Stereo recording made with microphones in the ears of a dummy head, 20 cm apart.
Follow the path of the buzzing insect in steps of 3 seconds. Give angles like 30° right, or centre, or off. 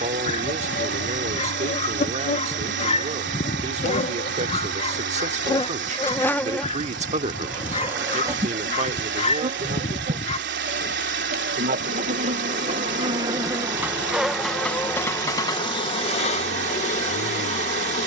30° left, 30° left, 10° right, 30° right, 10° right, 30° left.